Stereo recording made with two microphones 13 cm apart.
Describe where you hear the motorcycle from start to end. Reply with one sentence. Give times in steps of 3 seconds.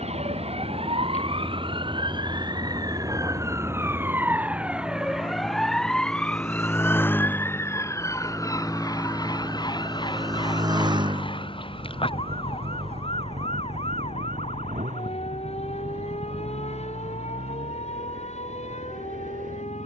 You can hear the motorcycle on the left from 0 s, in the centre from 6 s and on the right from 9 s.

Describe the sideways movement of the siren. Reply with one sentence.
You can hear the siren travel towards the left.